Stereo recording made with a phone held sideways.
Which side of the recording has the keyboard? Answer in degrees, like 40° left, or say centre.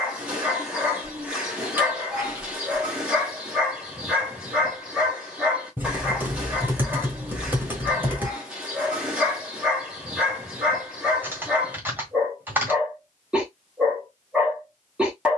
10° right.